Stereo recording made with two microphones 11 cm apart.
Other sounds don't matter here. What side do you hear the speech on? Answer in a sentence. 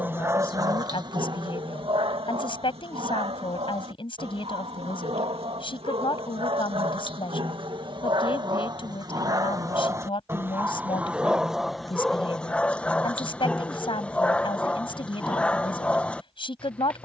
In this clip you hear the speech on the left.